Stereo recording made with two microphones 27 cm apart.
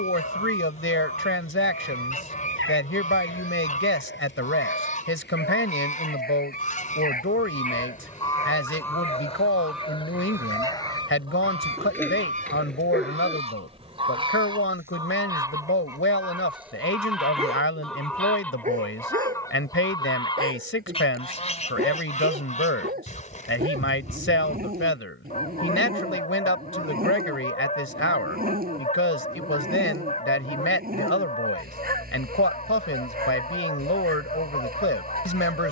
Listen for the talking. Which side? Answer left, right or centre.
left.